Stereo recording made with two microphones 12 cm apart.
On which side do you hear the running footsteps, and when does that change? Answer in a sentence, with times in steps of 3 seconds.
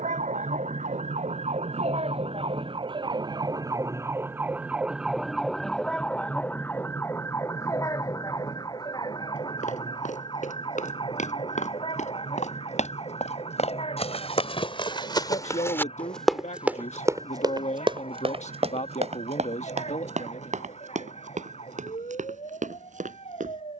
You can hear the running footsteps not at all from 0 s, on the left from 9 s, in the centre from 15 s and on the right from 18 s.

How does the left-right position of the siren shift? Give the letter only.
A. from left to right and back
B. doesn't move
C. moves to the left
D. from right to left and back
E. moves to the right
C.